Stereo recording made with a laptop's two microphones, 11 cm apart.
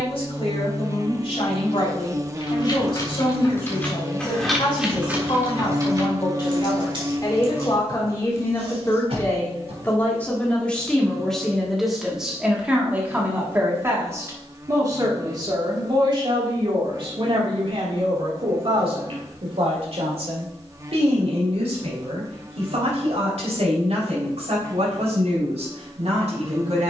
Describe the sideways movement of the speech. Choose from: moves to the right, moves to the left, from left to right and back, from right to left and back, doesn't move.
moves to the right.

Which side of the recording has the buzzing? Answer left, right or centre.
right.